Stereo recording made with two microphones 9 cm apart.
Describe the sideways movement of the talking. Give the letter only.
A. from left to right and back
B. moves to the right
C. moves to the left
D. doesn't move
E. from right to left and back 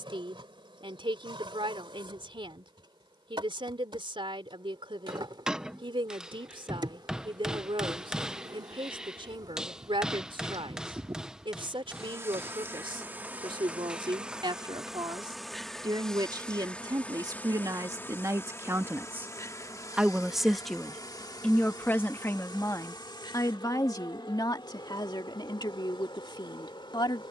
C.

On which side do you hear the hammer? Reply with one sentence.
In this clip you hear the hammer in the centre.